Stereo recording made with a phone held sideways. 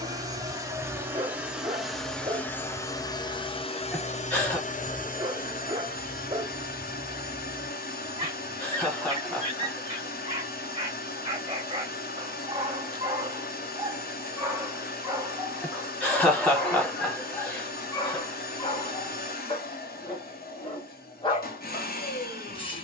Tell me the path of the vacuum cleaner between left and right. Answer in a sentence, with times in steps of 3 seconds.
You can hear the vacuum cleaner in the centre from 0 s and on the left from 3 s.